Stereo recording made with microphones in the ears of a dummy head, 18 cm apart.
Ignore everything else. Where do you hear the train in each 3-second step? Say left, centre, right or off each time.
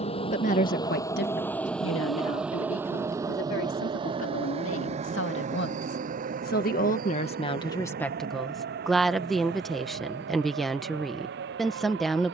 centre, right, right, right.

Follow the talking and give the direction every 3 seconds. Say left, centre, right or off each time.
left, left, left, centre.